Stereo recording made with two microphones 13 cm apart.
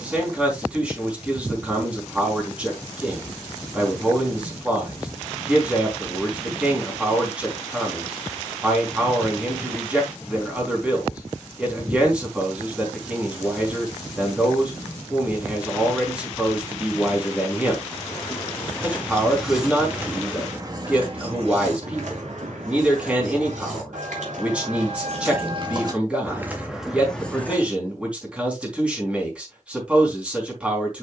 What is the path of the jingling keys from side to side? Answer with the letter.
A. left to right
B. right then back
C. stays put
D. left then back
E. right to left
B.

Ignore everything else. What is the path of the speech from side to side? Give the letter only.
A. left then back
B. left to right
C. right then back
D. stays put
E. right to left
D.